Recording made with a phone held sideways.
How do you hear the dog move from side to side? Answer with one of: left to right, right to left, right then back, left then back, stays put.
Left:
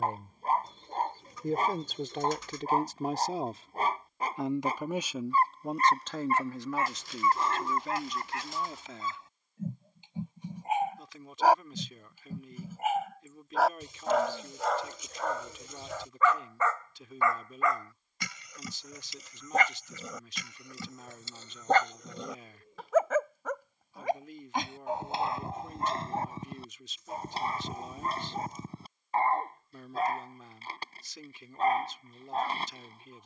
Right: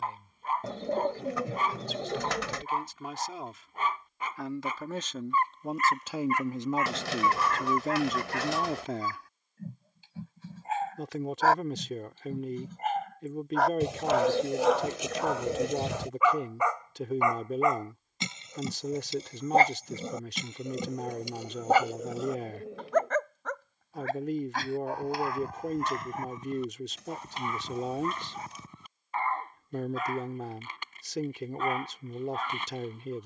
right then back.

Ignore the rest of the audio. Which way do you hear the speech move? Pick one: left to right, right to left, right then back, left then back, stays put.
left to right.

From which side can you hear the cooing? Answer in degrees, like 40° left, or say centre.
80° right.